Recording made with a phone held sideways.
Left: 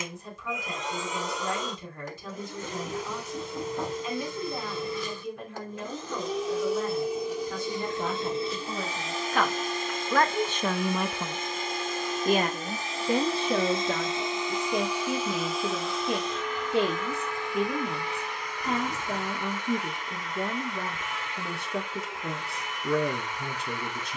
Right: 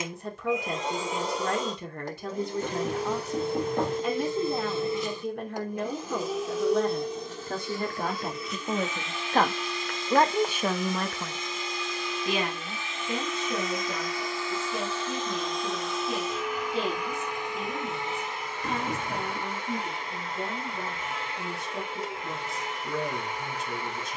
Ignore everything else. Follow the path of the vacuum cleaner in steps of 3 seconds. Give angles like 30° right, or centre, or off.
30° right, 20° right, 10° left, 50° left, 30° left, 10° right, 30° right, 30° right.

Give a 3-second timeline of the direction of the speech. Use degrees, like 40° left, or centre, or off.
70° right, 70° right, 60° right, 10° right, 60° left, 70° left, 70° left, 70° left.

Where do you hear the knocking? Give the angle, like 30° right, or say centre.
60° right.